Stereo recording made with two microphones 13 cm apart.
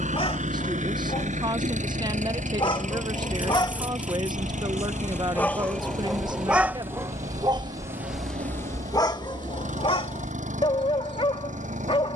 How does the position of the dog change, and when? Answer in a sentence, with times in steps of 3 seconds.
You can hear the dog on the left from 0 s, in the centre from 6 s and on the left from 9 s.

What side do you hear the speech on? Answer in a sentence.
You can hear the speech on the right.